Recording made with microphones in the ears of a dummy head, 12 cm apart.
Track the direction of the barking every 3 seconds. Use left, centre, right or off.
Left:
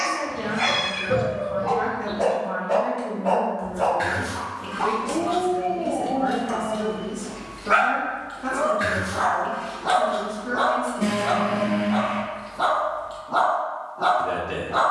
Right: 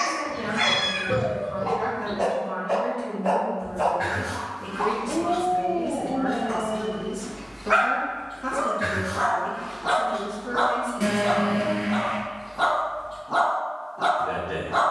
right, centre, centre, right, right.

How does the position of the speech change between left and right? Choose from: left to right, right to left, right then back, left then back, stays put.
right then back.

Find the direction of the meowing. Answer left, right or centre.
right.